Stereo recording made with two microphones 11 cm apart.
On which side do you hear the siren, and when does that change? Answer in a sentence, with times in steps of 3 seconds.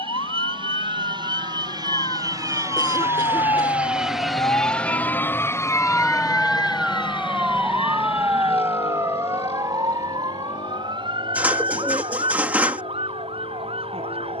You can hear the siren on the left from 0 s, in the centre from 6 s and on the right from 9 s.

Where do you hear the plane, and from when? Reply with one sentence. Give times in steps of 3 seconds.
You can hear the plane on the right from 0 s, in the centre from 3 s and on the left from 6 s.